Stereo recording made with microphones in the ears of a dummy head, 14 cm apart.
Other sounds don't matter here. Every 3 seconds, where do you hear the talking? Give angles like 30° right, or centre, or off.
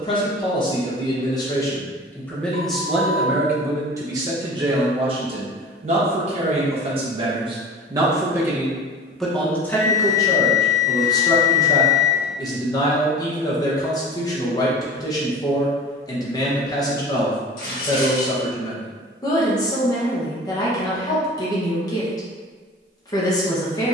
20° left, 30° right, 30° right, 20° left, 30° left, 30° left, 30° left, 30° left.